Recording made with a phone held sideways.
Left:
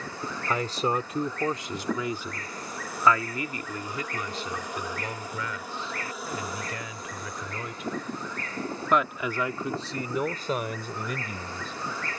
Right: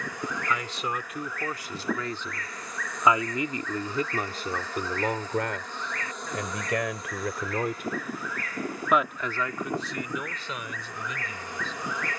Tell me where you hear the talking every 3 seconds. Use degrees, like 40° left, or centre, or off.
20° left, 40° right, 60° right, 40° left.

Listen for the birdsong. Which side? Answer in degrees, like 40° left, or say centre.
30° left.